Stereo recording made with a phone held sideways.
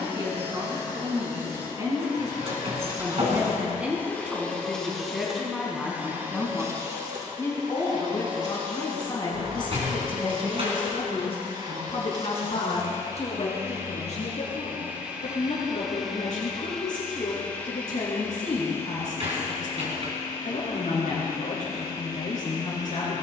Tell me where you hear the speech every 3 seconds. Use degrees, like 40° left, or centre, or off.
30° right, centre, 20° left, 40° left, 50° left, 60° left, 60° left, 60° left.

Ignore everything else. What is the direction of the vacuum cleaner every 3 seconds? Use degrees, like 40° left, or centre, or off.
30° left, 10° left, 30° right, 40° right, 20° right, centre, 20° left, 30° left.